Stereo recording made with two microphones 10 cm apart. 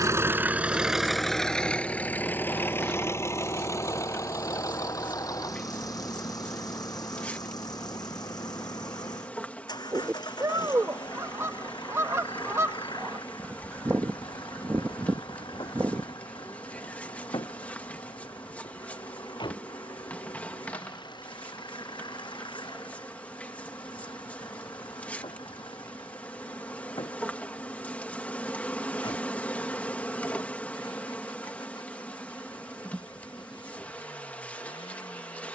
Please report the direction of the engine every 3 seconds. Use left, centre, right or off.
centre, left, left, left, left, left, left, left, left, left, left, left.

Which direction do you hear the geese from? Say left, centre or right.
right.